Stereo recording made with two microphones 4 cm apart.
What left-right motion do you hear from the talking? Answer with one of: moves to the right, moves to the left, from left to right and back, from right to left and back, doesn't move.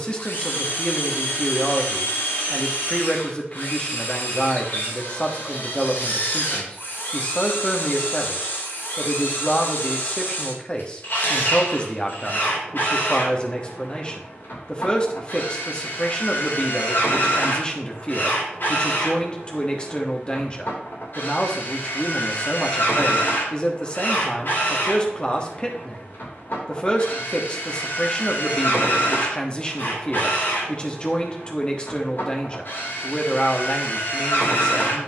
doesn't move.